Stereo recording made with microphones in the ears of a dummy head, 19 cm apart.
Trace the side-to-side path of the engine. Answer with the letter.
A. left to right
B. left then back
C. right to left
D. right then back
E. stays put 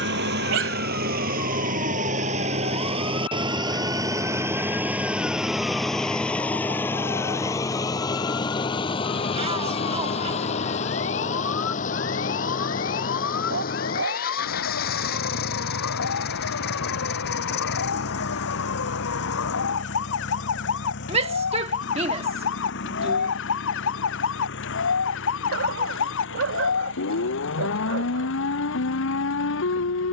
C.